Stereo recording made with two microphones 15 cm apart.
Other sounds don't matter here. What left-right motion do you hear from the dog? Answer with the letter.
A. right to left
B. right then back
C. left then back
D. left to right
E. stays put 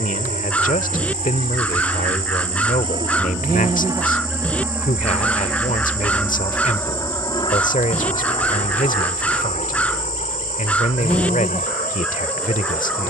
E.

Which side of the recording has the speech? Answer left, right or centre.
left.